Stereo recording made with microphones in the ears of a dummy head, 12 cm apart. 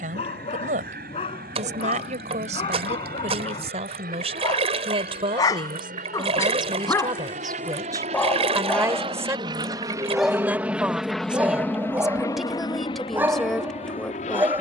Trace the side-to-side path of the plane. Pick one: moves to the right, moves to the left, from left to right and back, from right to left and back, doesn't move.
moves to the left.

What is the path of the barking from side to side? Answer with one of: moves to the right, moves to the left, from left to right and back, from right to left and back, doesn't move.
moves to the right.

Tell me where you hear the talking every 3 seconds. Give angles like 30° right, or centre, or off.
60° right, 50° right, 30° right, 10° right, centre.